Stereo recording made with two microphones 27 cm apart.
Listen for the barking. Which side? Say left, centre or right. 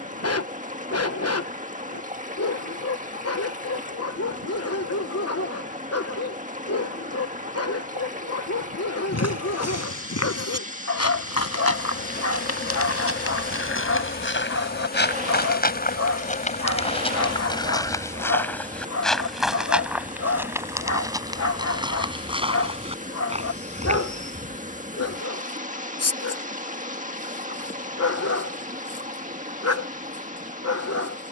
left.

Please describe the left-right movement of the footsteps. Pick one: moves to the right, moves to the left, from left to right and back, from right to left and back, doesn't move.
moves to the right.